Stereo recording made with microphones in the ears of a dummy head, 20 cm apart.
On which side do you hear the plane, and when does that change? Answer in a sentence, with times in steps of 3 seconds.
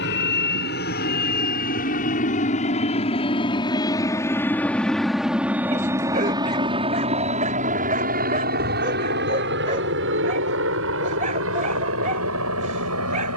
You can hear the plane on the left from 0 s, in the centre from 3 s and on the right from 6 s.